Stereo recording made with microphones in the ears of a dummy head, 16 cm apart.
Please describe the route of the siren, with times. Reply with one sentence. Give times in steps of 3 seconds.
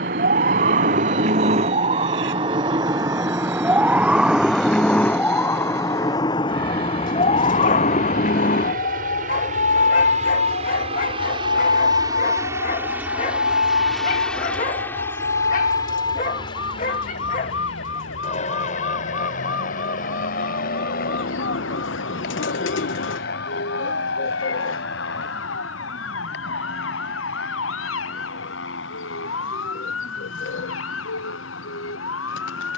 You can hear the siren on the right from 0 s, in the centre from 3 s and on the left from 6 s.